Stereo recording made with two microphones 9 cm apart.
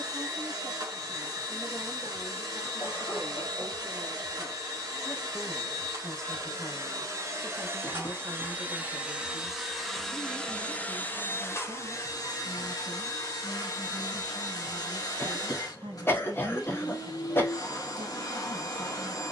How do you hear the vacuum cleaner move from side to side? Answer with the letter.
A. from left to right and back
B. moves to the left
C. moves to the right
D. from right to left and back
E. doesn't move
B.